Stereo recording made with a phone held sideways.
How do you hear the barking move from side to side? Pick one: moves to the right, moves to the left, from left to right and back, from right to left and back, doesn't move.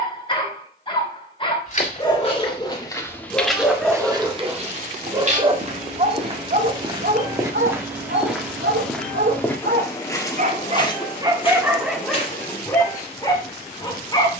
from left to right and back.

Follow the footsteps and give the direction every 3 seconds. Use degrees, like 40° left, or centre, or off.
30° left, 30° right, 20° right, 20° left, 40° left.